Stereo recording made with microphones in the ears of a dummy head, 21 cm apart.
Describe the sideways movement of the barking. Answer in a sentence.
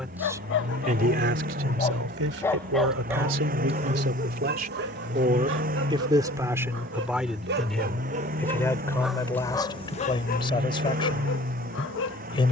You can hear the barking go right and come back.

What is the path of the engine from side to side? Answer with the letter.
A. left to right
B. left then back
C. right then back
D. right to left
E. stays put
E.